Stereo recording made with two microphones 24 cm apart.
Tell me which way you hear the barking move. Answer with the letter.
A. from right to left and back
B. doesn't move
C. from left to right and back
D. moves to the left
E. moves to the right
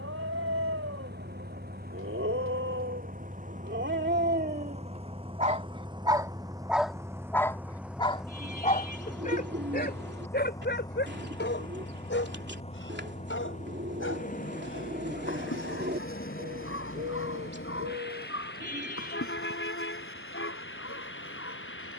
D.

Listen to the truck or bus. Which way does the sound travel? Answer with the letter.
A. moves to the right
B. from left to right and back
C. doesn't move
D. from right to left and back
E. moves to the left
E.